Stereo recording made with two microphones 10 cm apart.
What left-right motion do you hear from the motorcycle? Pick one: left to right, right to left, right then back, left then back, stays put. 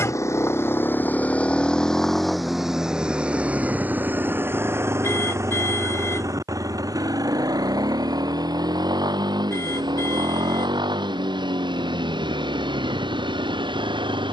left to right.